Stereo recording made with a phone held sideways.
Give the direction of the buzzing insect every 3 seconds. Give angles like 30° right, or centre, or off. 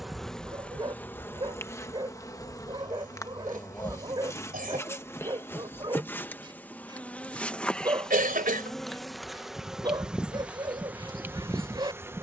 10° left, 20° left, 10° left, 10° right.